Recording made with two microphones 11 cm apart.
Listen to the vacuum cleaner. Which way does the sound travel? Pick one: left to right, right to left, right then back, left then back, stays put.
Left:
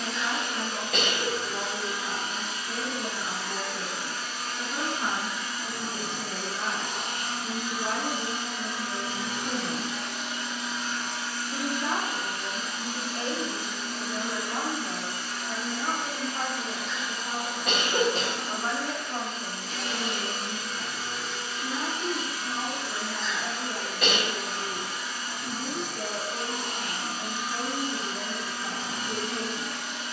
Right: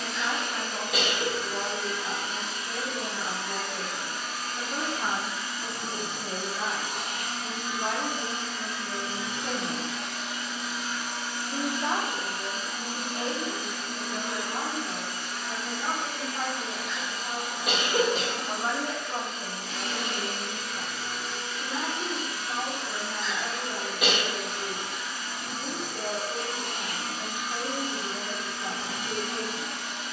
left then back.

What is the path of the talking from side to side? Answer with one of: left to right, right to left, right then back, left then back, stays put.
left then back.